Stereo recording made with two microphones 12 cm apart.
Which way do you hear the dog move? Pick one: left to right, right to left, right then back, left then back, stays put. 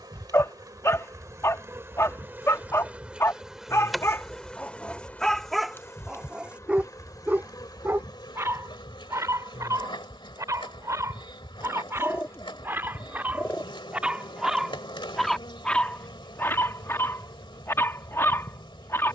right then back.